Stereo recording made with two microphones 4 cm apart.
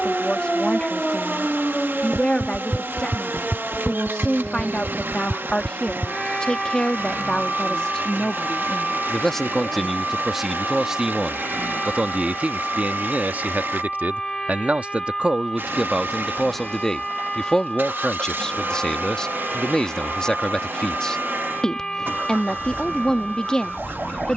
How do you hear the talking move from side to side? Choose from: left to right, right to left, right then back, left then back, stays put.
right then back.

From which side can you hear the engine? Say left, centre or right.
right.